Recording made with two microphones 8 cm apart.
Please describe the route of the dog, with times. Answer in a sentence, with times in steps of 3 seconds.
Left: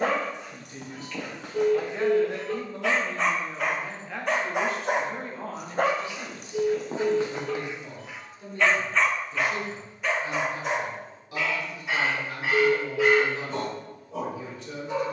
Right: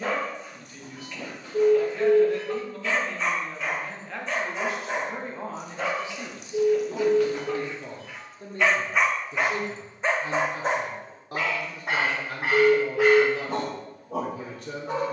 In this clip you hear the dog on the left from 0 s and on the right from 9 s.